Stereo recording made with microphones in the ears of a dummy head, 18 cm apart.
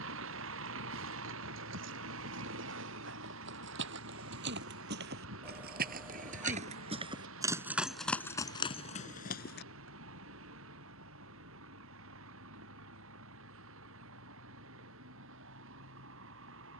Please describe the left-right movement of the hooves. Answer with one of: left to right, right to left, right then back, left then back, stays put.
right to left.